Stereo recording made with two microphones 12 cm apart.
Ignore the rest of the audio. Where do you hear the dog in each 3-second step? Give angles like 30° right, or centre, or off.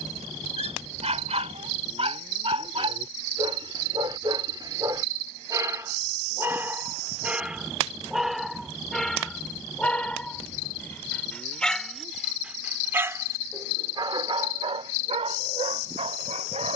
60° right, 40° right, 10° right, 10° left, 30° right, 70° right.